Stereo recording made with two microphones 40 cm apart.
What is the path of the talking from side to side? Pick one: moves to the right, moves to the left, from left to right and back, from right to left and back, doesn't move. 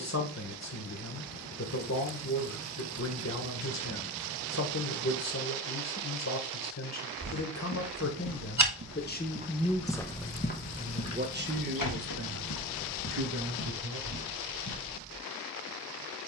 moves to the right.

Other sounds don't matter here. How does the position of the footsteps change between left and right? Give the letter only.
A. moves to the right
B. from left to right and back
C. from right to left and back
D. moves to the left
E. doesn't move
D.